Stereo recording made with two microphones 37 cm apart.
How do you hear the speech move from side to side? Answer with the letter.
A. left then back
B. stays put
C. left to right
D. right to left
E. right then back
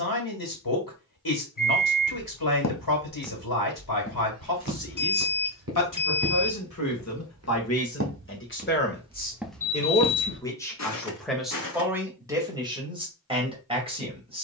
C.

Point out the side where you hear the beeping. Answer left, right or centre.
left.